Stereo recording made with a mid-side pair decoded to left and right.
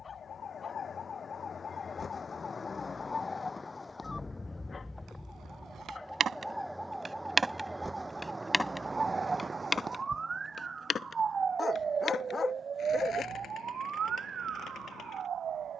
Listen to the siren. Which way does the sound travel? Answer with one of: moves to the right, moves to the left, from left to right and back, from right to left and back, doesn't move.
moves to the right.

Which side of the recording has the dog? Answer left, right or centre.
left.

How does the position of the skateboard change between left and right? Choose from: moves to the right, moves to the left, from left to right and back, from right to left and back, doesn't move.
moves to the left.